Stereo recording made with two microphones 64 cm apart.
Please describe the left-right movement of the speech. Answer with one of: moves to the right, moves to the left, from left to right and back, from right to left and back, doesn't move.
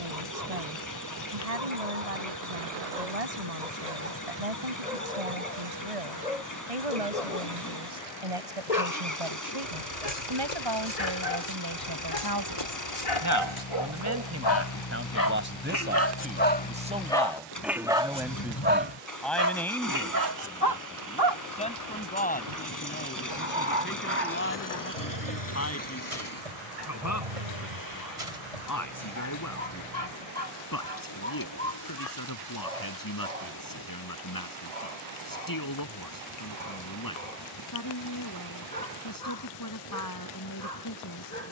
moves to the left.